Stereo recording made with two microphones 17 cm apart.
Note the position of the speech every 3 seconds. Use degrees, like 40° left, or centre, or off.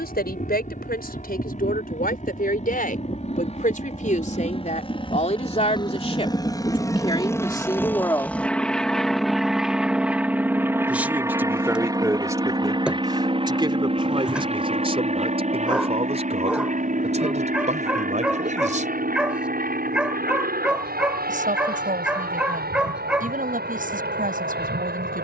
60° left, 50° left, 30° left, 10° right, 30° right, 40° right, 50° right, 50° right, 60° right.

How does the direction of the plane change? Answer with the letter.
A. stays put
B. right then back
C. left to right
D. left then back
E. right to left
C.